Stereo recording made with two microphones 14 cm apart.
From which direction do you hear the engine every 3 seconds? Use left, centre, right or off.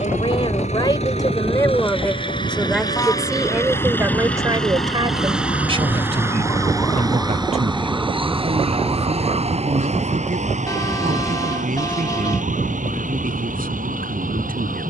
left, centre, right, right, right.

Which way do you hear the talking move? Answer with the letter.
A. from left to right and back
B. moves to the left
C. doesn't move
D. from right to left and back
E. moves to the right
E.